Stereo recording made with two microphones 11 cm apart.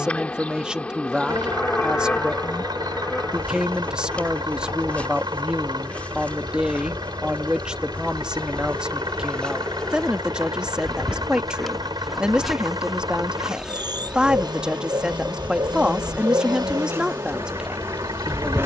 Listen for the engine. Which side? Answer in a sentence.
In this clip you hear the engine on the right.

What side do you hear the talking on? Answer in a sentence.
You can hear the talking in the centre.